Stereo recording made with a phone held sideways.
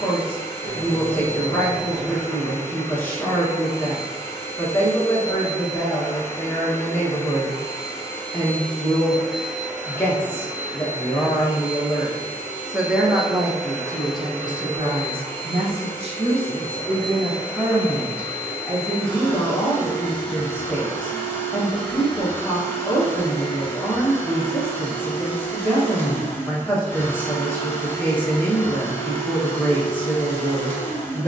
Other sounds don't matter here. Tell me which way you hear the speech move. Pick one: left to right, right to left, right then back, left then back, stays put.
right then back.